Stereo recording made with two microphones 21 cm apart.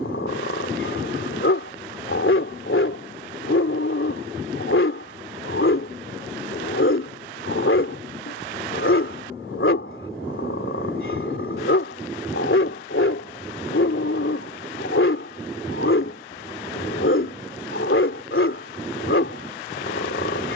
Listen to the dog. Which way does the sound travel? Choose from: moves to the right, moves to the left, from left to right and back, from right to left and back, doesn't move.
doesn't move.